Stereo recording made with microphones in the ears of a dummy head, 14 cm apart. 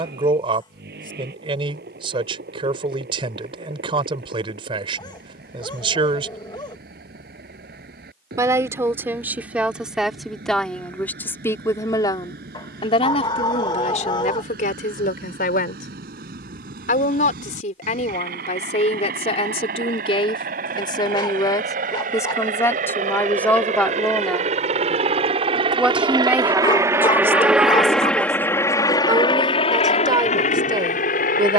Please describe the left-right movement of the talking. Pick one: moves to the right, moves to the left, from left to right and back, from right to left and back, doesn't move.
from right to left and back.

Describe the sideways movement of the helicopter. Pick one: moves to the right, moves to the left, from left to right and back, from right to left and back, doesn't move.
moves to the left.